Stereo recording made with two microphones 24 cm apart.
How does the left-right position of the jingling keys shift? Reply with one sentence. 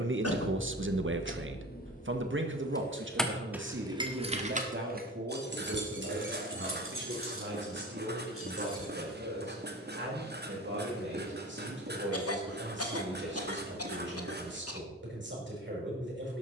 In this clip you hear the jingling keys move to the right.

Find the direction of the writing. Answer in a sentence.
In this clip you hear the writing on the right.